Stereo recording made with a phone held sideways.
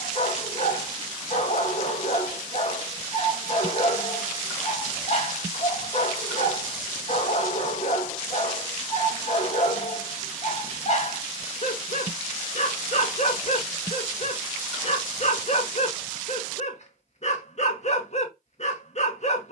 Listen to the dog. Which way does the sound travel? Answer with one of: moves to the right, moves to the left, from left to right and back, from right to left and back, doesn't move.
doesn't move.